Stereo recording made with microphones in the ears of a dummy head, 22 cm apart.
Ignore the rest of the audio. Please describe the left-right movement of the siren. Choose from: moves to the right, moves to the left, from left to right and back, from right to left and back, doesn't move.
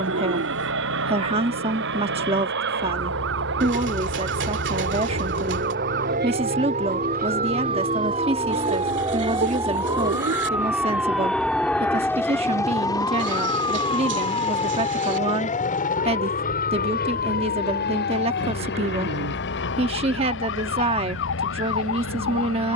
moves to the left.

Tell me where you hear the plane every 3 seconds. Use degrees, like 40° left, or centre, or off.
50° right, 40° right, 30° right, centre, 20° left, 40° left, 50° left, 50° left.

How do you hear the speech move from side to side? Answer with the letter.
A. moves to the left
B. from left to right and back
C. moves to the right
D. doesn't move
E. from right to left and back
D.